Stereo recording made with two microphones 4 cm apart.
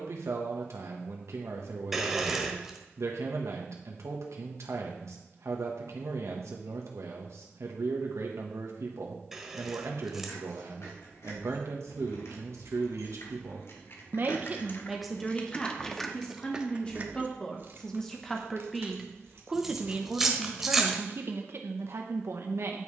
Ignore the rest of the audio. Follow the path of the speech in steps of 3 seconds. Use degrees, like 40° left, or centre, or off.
80° right, 80° right, 80° right, 80° right, 60° right, 20° left, 20° right, 60° right.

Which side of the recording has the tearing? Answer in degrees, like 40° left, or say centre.
10° right.